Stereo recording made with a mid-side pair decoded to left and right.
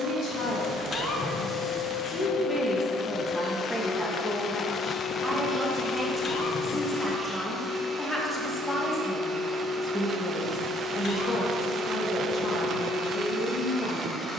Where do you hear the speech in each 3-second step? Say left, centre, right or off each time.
left, centre, centre, left, left.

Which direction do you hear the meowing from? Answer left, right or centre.
left.